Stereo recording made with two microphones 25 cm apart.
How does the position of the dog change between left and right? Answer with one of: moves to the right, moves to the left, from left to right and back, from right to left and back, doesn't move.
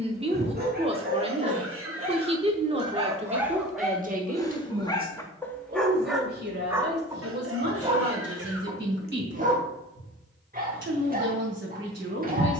from right to left and back.